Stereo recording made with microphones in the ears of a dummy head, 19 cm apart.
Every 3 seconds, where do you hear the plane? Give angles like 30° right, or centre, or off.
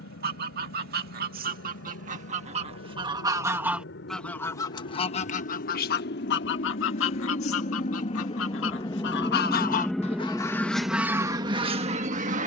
70° left, 60° left, 40° left, 10° right.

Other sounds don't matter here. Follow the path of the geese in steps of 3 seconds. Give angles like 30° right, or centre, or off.
40° right, 10° left, 60° left, 10° left.